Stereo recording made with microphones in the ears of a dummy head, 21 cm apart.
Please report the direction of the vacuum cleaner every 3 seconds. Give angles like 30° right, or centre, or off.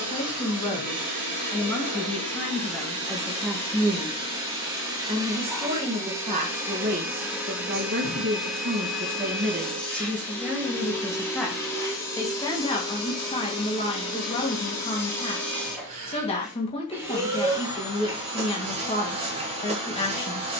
30° right, 20° right, 10° right, 10° left, 20° left, centre, 30° right.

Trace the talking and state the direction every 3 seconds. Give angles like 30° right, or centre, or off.
10° left, 10° right, 40° right, 10° right, 20° left, 20° left, 20° left.